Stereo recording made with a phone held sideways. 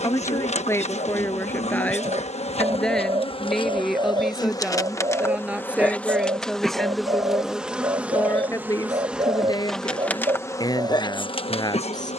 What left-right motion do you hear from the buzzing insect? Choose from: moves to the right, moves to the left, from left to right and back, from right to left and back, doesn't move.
from left to right and back.